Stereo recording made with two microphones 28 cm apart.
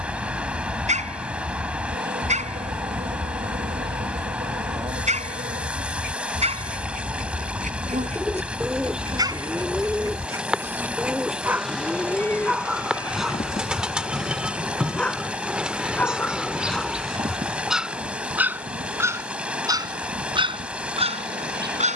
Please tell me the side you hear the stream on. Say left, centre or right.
centre.